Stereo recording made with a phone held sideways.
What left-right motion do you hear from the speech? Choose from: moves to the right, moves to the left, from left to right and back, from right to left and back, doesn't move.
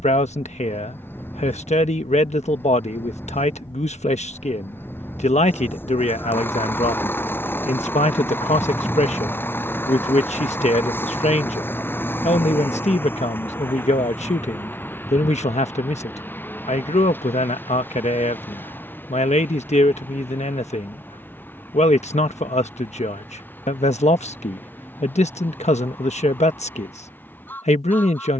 doesn't move.